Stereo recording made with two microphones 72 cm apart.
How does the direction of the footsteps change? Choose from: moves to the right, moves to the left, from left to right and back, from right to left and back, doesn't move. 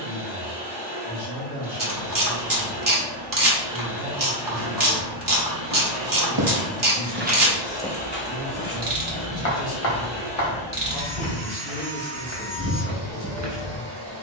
from right to left and back.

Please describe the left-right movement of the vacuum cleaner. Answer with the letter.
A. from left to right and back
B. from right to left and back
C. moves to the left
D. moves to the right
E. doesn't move
B.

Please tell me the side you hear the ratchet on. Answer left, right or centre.
right.